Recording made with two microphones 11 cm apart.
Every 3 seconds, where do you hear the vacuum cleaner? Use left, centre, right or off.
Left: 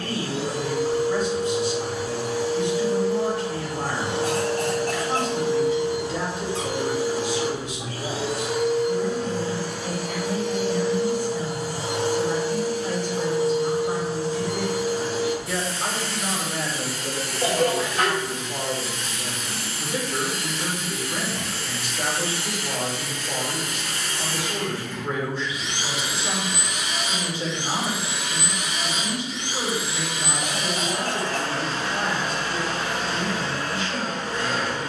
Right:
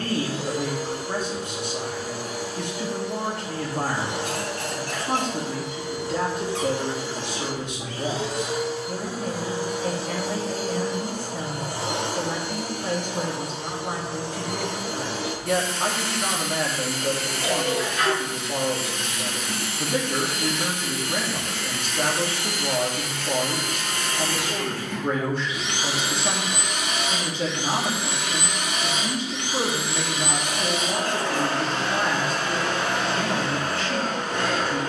left, left, centre, right, right, right, right, right, right, right, right, right.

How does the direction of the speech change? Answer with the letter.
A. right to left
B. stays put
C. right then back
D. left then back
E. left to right
B.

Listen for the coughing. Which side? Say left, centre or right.
left.